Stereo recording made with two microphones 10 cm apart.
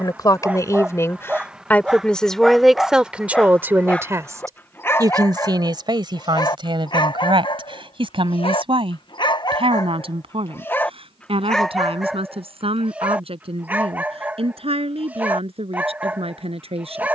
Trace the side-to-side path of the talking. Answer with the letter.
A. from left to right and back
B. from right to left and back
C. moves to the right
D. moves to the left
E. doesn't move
C.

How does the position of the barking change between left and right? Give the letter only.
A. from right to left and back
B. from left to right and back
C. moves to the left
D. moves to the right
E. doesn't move
A.